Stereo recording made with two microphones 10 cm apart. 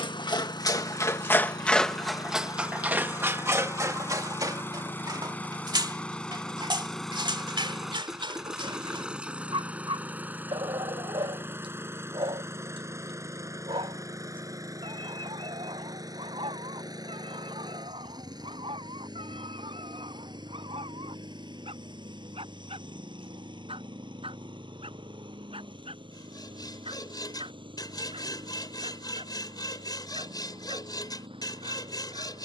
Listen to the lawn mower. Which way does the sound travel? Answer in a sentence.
In this clip you hear the lawn mower move from left to right.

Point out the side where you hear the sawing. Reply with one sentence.
In this clip you hear the sawing on the left.